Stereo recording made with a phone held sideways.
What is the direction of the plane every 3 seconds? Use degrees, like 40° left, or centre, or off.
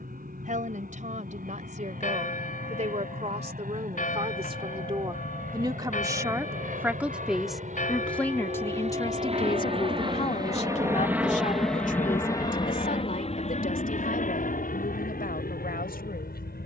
70° right, 70° right, 60° right, 20° right, 40° left, 60° left.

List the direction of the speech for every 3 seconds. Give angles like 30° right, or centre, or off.
50° right, 40° right, centre, 40° left, 70° left, 70° left.